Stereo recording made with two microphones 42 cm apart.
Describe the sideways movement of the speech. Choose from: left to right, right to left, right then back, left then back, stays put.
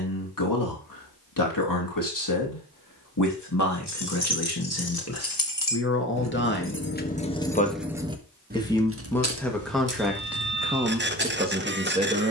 left to right.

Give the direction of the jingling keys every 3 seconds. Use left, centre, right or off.
off, left, centre, right.